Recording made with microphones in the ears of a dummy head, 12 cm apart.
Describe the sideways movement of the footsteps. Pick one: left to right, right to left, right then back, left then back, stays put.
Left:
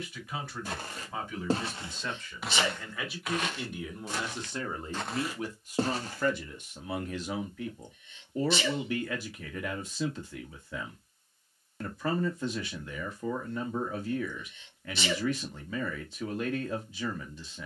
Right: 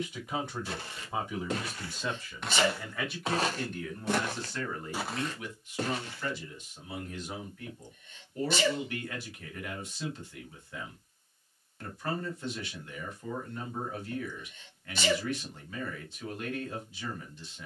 right then back.